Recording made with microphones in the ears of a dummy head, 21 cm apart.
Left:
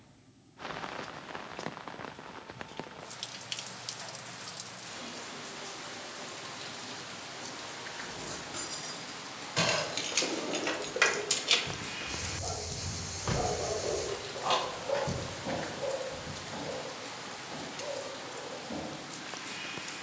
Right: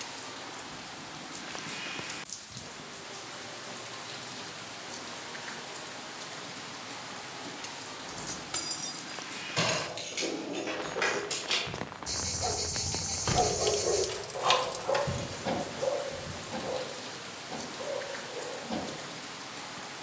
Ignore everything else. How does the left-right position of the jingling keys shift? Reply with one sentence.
You can hear the jingling keys move from right to left and back again.